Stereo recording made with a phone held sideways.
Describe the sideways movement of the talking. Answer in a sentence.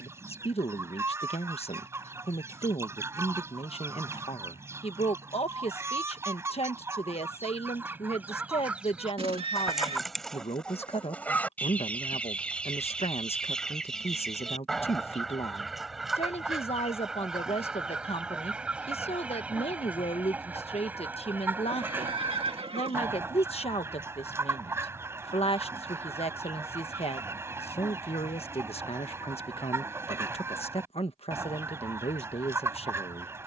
You can hear the talking stay put.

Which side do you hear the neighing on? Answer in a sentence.
You can hear the neighing on the right.